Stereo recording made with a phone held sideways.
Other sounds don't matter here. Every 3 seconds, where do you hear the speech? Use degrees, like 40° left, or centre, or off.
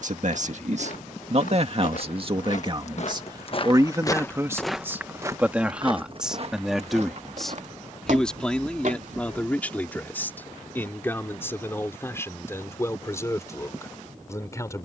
50° right, 20° right, centre, 10° left, 20° left.